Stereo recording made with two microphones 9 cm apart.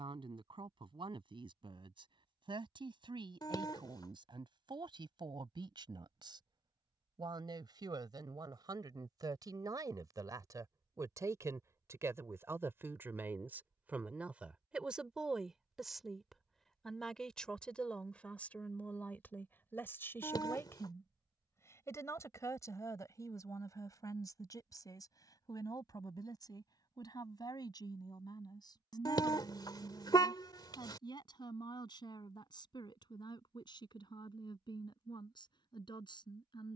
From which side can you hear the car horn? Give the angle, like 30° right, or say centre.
50° left.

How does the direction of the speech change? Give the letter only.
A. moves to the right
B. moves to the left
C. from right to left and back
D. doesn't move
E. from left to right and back
B.